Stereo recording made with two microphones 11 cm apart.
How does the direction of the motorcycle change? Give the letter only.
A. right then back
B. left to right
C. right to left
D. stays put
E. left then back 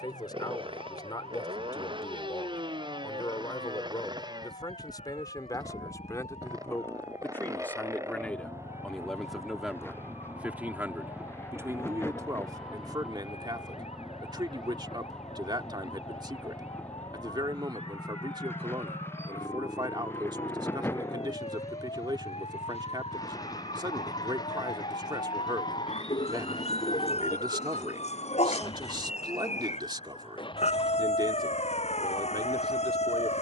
C.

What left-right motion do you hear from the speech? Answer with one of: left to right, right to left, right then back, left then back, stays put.
left to right.